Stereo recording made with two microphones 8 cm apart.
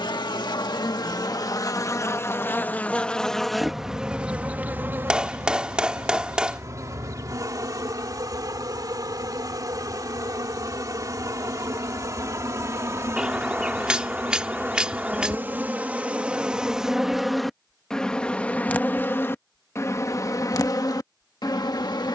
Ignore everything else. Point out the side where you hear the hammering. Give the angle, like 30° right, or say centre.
10° right.